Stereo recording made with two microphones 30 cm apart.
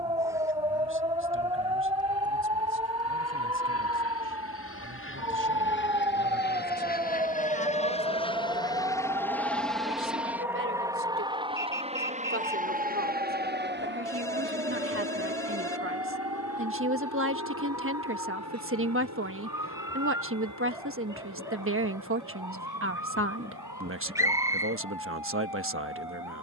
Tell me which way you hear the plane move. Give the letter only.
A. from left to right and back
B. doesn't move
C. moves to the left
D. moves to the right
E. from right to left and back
D.